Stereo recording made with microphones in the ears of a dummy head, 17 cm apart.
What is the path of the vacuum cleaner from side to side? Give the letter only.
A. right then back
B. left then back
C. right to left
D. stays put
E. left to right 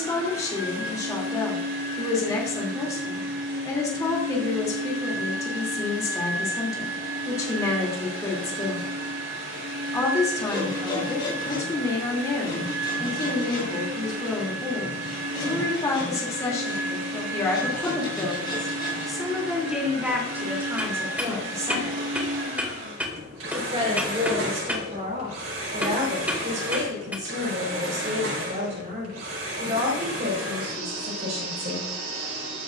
D.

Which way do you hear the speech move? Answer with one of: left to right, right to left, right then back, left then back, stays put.
left to right.